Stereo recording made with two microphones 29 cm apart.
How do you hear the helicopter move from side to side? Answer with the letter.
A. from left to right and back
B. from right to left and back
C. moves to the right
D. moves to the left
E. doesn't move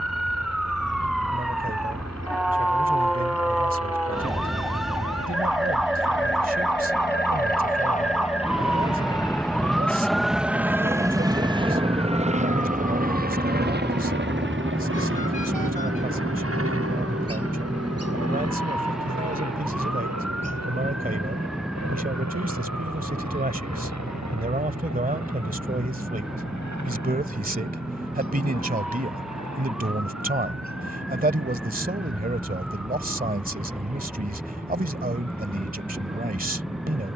C.